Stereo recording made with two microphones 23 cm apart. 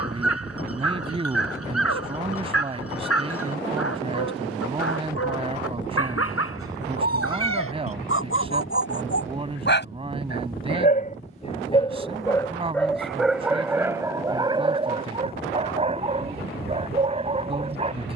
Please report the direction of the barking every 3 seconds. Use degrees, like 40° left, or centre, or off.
80° left, 80° left, 70° left, 40° left, 10° right, 30° right.